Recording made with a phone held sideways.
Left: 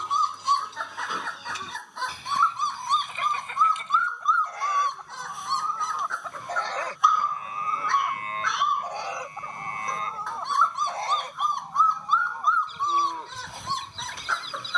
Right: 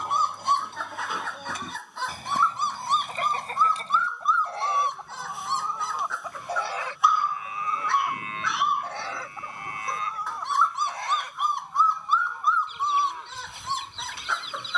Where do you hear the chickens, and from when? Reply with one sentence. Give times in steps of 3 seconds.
In this clip you hear the chickens on the right from 0 s, in the centre from 6 s and on the left from 9 s.